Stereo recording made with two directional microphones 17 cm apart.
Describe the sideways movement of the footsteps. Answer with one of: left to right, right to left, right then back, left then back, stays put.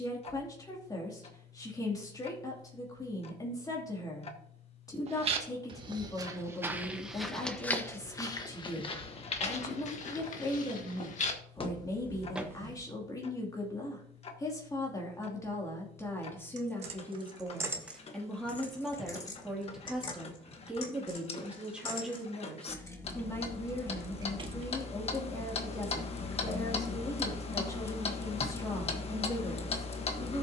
left then back.